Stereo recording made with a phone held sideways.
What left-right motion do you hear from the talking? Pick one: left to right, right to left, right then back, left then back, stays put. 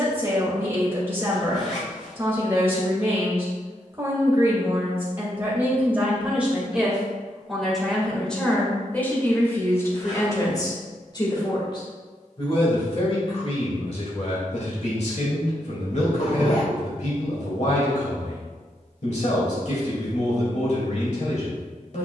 right to left.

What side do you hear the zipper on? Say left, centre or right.
left.